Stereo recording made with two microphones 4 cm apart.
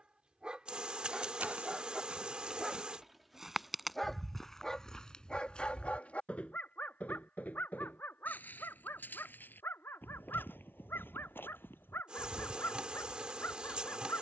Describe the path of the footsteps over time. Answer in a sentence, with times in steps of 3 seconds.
You can hear the footsteps on the right from 0 s, in the centre from 3 s and on the left from 6 s.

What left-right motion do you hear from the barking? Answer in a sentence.
You can hear the barking move from right to left.